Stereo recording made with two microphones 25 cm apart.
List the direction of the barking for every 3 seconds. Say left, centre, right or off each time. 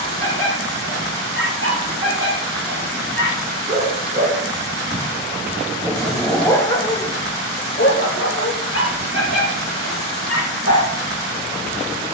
right, right, left, left.